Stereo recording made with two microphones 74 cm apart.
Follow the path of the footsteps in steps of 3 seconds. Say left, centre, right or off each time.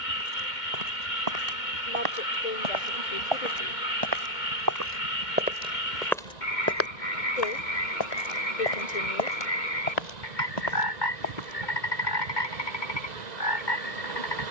right, right, left, left, off.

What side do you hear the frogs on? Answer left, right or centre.
left.